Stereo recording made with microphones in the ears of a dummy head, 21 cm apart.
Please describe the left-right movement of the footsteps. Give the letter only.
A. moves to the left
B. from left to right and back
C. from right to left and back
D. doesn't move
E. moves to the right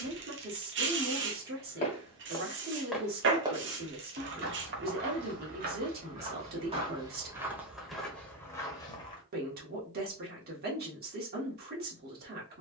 B.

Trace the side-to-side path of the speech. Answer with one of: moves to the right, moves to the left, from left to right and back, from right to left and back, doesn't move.
doesn't move.